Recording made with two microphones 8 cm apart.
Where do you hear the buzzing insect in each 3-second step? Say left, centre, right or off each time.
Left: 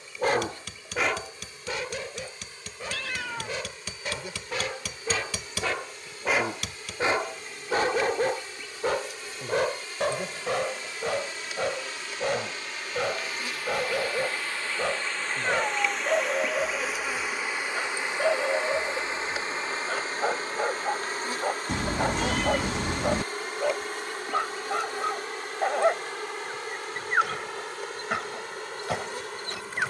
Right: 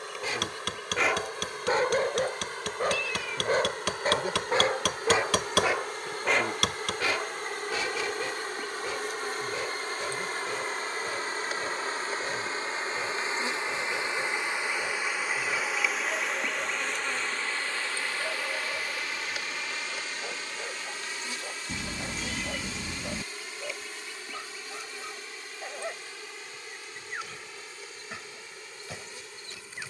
right, right, right, right, right, centre, left, left, left, left.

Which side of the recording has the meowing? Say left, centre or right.
left.